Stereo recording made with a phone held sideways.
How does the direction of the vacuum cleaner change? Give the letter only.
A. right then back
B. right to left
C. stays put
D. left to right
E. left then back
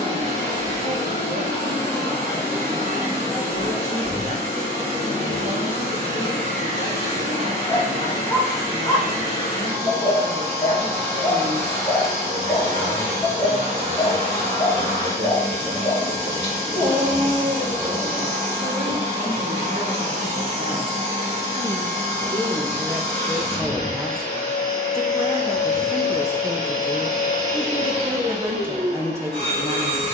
C.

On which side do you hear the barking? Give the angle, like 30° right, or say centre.
20° left.